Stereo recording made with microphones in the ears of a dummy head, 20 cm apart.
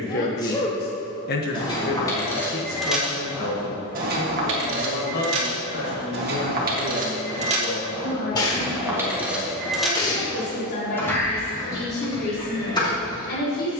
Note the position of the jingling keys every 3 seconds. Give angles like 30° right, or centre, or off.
10° left, 50° right, 40° right, centre, 20° left.